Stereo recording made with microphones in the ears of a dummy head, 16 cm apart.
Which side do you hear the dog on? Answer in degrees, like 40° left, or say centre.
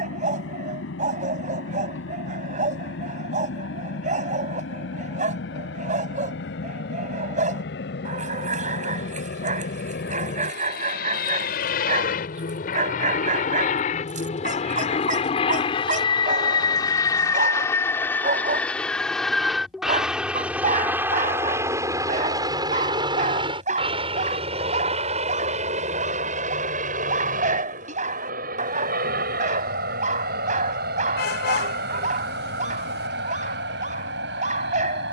40° right.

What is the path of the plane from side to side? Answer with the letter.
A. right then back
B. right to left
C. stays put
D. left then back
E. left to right
E.